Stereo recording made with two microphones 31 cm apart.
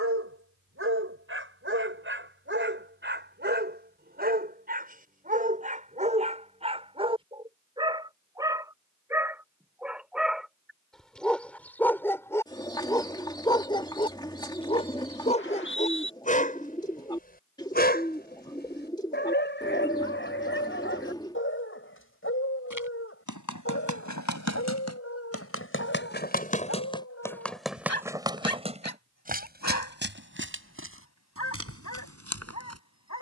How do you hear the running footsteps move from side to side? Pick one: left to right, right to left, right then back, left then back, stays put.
left to right.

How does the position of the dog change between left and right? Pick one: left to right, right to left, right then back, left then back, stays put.
right to left.